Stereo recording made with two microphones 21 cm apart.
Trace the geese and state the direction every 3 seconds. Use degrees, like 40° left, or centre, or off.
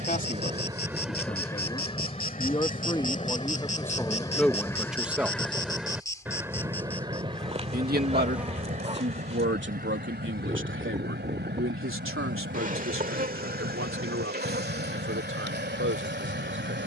10° left, 20° left, 30° right, 50° right, 50° right, 50° right.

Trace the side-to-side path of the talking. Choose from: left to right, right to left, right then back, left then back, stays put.
left to right.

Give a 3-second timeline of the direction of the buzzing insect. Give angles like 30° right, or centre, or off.
50° left, 30° left, 10° left, 30° right, 40° right, 50° right.